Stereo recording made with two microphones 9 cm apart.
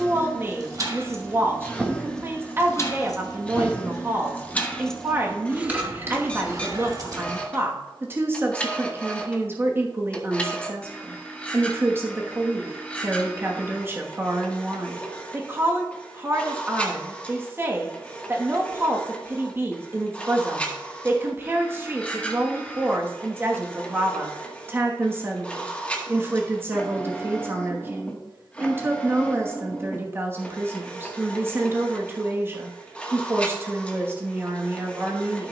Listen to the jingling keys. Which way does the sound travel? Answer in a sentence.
In this clip you hear the jingling keys go left and come back.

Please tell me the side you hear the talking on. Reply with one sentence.
You can hear the talking on the right.